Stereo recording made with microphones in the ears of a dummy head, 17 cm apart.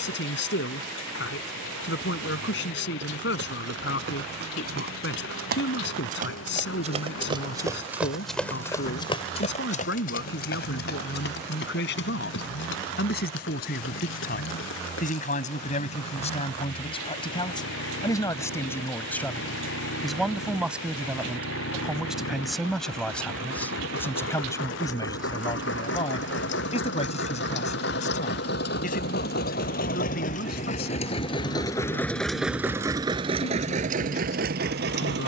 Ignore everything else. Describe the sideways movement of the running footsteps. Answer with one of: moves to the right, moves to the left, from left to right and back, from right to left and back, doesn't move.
moves to the left.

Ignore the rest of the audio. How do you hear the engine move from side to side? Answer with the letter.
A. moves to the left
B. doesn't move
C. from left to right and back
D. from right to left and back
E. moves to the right
E.